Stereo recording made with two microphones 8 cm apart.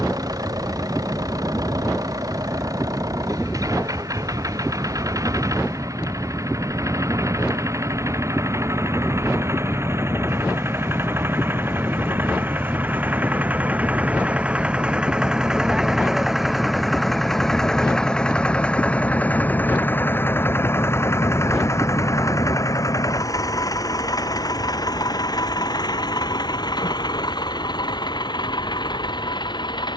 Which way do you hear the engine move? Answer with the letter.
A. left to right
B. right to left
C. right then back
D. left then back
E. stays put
B.